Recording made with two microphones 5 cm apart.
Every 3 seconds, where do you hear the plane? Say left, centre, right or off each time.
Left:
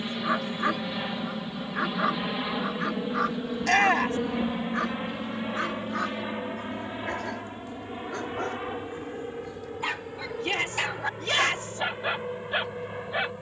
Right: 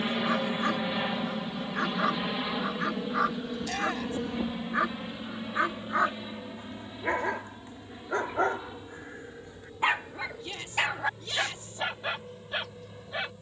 centre, left, left, left, left.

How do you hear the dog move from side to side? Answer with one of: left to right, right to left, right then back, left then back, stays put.
right then back.